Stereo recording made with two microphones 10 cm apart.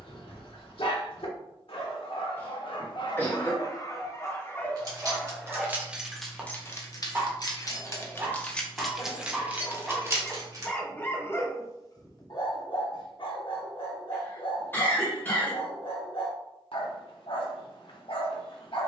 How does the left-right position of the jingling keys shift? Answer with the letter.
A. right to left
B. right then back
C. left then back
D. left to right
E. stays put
C.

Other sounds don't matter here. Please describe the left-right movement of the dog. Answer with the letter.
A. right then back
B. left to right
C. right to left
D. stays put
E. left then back
A.